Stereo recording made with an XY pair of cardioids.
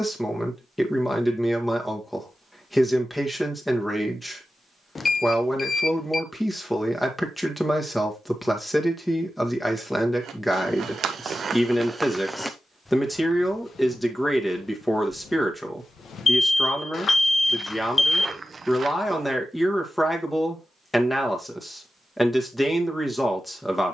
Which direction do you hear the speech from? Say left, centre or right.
centre.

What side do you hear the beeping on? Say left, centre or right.
left.